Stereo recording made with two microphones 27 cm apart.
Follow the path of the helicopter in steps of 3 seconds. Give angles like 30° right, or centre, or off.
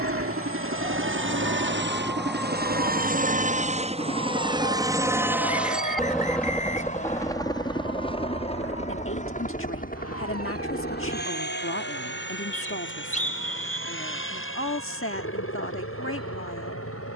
50° right, 20° right, 10° left, 30° left, 40° left, 50° left.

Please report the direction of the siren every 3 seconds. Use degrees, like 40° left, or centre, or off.
10° right, 30° left, 50° left, 60° left, 60° left, 70° left.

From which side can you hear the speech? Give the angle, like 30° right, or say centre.
50° left.